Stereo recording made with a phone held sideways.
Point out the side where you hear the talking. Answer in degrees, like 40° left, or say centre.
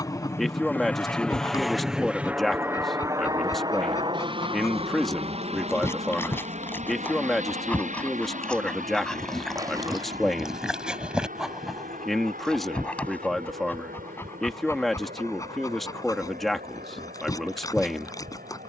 centre.